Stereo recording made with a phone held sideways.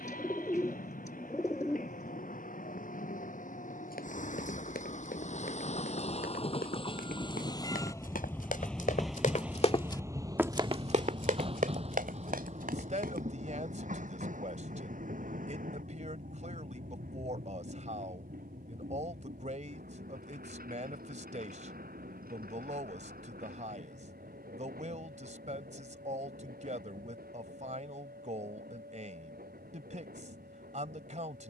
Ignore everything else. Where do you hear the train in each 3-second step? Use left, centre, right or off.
left, left, left, right, right, right, right, right, right, right, right.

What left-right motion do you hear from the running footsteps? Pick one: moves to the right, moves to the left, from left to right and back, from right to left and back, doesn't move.
moves to the right.